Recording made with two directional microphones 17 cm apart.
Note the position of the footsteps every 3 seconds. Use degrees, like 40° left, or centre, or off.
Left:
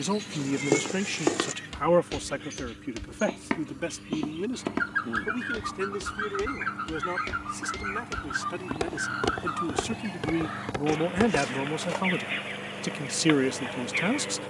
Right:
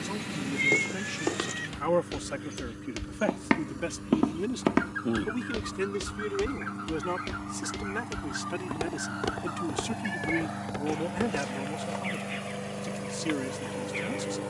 10° left, 30° right, centre, 30° left, off.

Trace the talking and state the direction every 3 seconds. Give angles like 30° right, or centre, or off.
30° left, centre, 10° right, 20° left, 50° left.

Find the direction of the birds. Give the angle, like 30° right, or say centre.
40° left.